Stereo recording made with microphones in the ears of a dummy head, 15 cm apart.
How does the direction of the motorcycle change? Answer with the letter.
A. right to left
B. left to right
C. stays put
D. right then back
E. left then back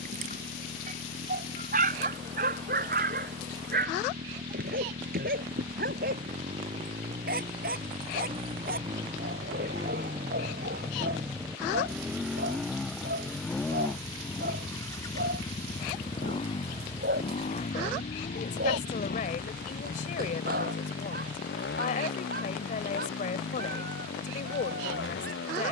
A.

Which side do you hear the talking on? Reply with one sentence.
In this clip you hear the talking on the left.